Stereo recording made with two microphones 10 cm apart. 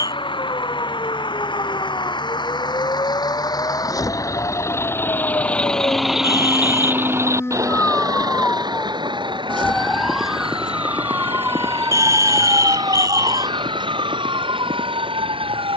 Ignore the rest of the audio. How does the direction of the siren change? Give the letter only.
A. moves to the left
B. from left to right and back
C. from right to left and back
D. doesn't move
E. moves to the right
E.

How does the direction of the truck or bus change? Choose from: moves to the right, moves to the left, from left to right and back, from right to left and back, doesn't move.
moves to the right.